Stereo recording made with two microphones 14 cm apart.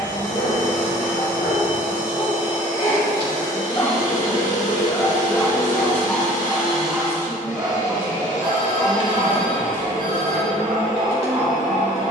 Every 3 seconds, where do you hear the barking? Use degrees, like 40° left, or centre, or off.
50° left, 20° left, 10° right, 50° right.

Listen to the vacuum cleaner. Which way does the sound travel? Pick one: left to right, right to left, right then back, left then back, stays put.
stays put.